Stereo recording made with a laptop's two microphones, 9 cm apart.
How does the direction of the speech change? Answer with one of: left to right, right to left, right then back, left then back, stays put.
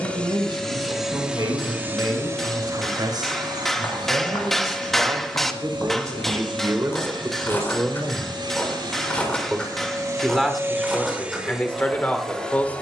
right to left.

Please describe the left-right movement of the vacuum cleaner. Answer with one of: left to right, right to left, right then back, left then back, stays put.
right then back.